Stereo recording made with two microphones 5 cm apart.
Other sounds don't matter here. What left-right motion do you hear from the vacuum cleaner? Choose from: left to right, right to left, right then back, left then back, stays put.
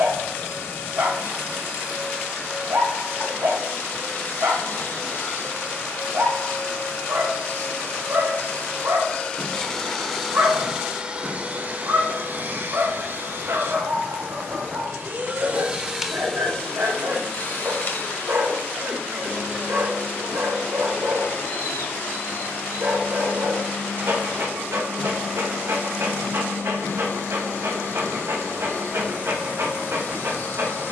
right then back.